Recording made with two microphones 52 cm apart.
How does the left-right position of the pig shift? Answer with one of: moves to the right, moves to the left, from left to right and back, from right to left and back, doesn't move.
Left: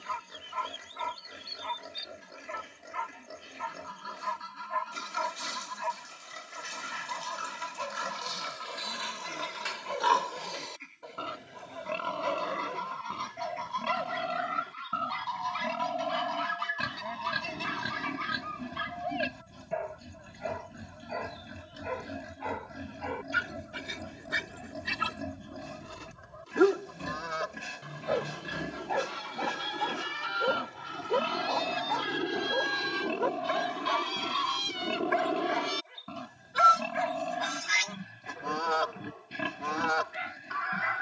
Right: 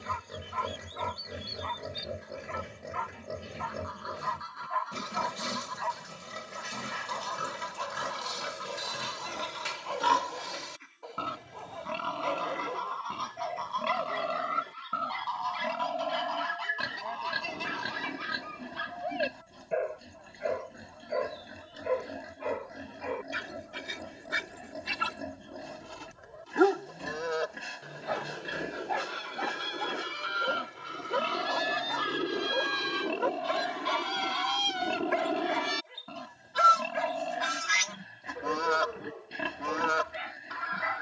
moves to the left.